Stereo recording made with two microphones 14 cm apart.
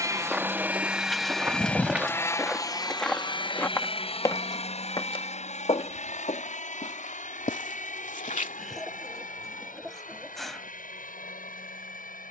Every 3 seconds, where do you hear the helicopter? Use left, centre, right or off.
centre, left, left, left.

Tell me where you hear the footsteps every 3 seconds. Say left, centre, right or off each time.
centre, left, left, off.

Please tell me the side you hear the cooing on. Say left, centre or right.
centre.